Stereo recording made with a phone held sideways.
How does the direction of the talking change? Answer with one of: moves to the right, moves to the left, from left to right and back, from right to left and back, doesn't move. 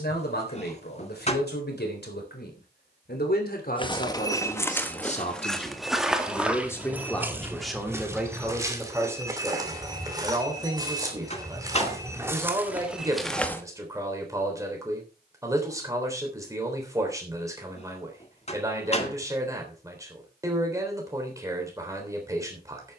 moves to the right.